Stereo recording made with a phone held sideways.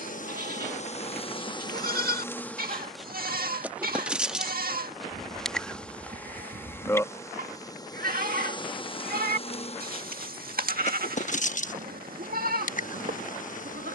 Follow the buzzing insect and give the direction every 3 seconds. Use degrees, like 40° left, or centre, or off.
30° left, centre, 20° left, 50° left, 60° left.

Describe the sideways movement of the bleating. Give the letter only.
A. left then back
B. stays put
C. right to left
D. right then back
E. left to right
B.